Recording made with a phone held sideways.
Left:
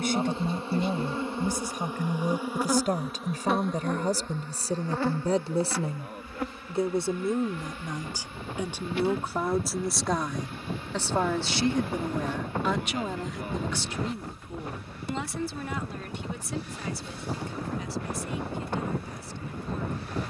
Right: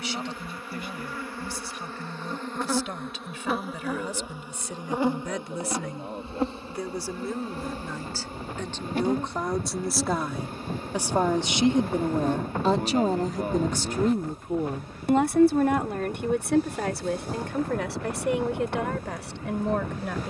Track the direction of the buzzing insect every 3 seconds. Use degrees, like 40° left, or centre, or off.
20° left, 10° right, 30° right, 40° right, 40° right, 40° right, 40° right.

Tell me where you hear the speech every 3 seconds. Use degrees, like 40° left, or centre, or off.
50° left, 40° left, 20° left, 10° right, 40° right, 60° right, 80° right.